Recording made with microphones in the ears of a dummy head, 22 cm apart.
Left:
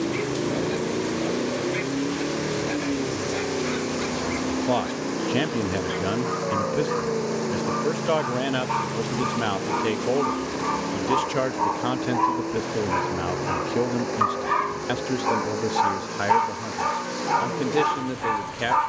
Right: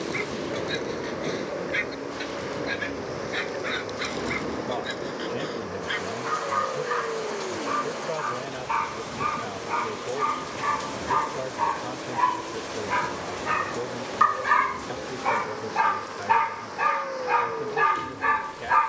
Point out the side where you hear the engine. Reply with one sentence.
You can hear the engine on the left.